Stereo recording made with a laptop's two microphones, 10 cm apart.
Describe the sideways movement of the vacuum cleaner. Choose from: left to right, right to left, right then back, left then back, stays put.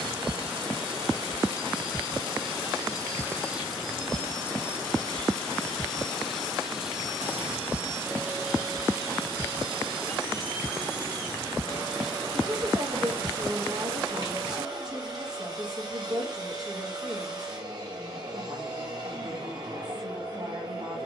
left then back.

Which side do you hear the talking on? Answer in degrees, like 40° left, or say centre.
40° right.